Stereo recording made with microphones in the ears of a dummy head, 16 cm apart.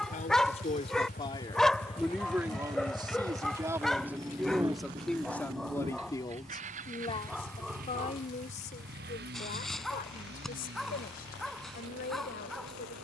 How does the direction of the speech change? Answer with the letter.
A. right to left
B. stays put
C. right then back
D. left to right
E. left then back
C.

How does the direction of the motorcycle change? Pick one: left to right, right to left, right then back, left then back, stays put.
left to right.